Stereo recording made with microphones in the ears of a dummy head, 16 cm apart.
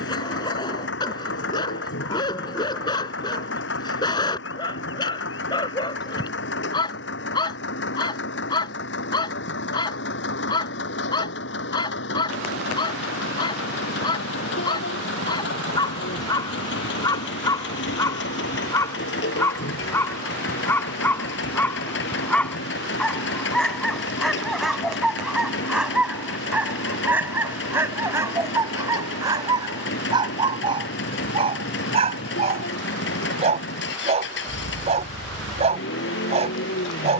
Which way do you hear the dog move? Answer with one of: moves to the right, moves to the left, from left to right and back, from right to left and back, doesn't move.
moves to the right.